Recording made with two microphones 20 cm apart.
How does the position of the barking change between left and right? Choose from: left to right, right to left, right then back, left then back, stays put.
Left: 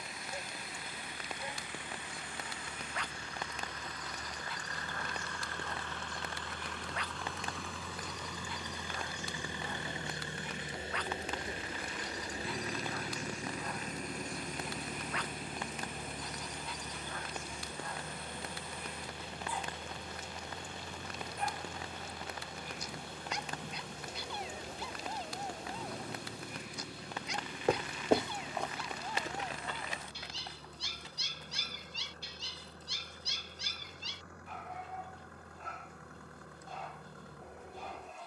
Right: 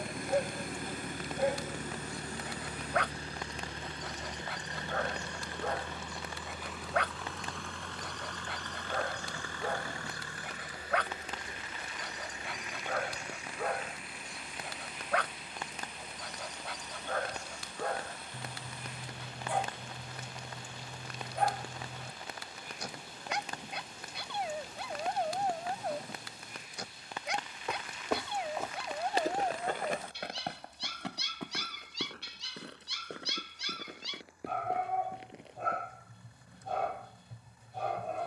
stays put.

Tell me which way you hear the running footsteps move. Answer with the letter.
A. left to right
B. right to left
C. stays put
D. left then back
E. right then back
A.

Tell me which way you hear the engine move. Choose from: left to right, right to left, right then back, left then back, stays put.
right to left.